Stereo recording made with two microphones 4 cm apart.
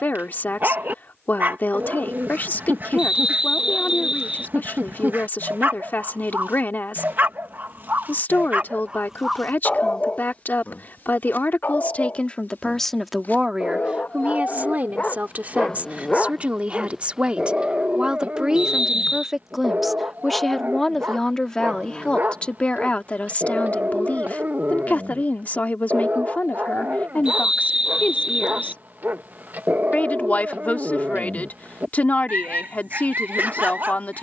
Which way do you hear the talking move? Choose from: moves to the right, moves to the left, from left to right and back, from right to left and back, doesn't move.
from left to right and back.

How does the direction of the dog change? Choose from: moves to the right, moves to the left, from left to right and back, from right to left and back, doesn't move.
from right to left and back.